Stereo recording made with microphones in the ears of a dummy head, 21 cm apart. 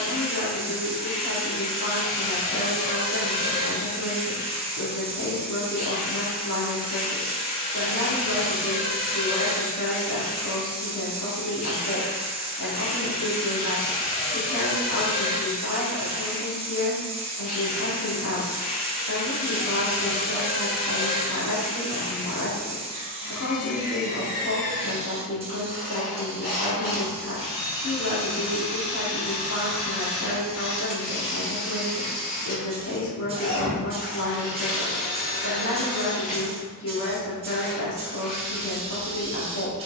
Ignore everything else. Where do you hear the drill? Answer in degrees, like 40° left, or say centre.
40° left.